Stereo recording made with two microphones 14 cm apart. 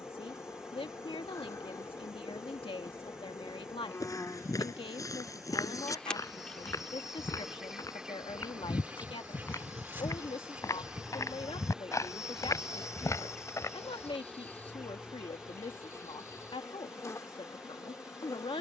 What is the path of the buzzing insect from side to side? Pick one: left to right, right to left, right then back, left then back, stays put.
right then back.